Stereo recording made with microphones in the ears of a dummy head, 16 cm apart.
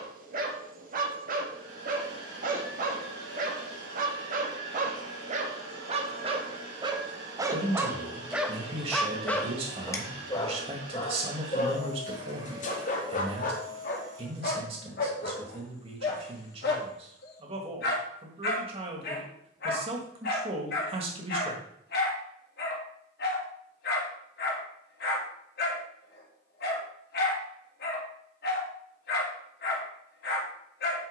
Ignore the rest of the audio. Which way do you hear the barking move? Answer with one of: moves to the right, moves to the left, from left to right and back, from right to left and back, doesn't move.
moves to the left.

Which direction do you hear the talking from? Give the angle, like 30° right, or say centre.
30° right.